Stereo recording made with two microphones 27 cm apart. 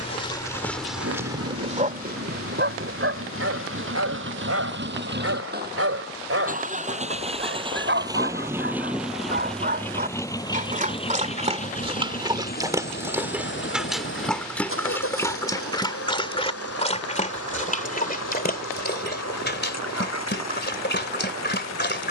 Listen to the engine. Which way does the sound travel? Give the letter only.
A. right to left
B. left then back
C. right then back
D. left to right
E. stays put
A.